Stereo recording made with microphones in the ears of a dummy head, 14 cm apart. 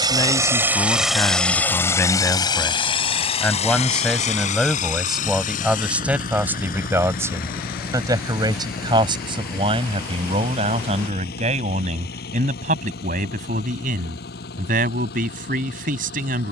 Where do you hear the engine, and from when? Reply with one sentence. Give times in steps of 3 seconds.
You can hear the engine in the centre from 0 s and on the left from 3 s.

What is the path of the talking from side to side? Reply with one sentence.
You can hear the talking go from the left side to the right.